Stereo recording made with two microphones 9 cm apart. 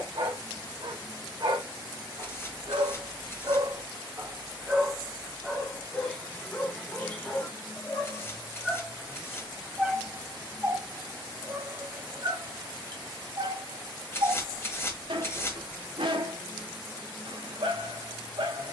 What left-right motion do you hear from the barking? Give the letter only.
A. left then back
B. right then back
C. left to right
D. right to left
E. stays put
A.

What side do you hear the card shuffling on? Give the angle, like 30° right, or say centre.
30° left.